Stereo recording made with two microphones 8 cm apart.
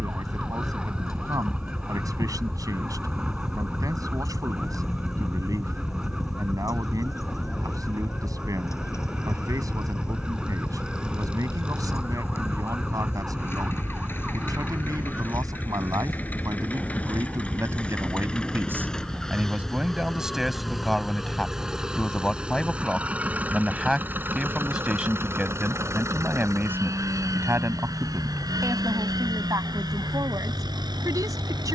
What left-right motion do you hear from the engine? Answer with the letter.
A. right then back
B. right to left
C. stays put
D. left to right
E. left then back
D.